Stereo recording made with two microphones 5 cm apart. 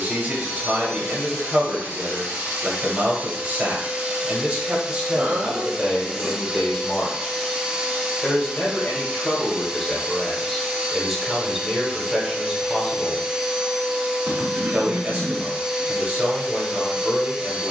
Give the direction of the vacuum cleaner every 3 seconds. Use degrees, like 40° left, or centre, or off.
50° right, 30° right, 20° right, 20° right, 20° right, 20° right.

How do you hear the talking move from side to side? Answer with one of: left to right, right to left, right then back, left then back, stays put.
left then back.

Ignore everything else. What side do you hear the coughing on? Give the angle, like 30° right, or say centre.
60° right.